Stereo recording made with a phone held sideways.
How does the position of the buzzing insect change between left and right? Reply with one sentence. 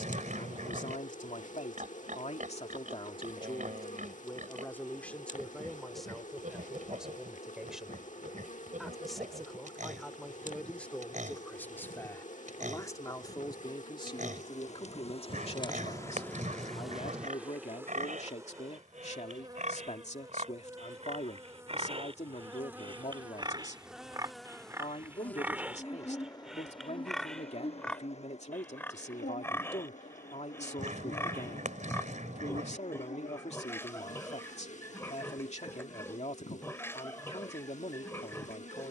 In this clip you hear the buzzing insect move from left to right and back again.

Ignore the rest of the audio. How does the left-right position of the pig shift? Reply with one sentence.
You can hear the pig move to the left.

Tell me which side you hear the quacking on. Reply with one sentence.
You can hear the quacking on the right.